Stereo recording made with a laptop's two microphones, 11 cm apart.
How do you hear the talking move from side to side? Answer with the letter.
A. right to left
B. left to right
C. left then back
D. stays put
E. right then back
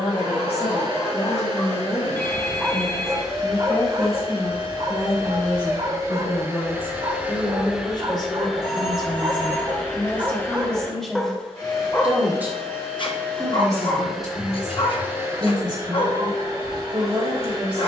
B.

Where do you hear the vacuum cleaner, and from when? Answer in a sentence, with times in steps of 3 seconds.
In this clip you hear the vacuum cleaner on the right from 0 s, in the centre from 6 s, on the left from 9 s, in the centre from 12 s and on the right from 15 s.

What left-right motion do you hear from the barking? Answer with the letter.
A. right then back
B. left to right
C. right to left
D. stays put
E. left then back
A.